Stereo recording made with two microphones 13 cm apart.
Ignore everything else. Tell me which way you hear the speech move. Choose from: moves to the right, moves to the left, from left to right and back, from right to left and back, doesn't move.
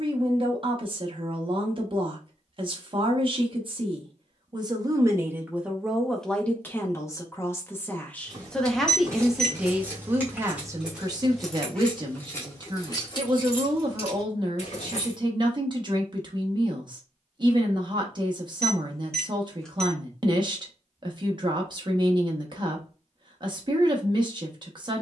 from right to left and back.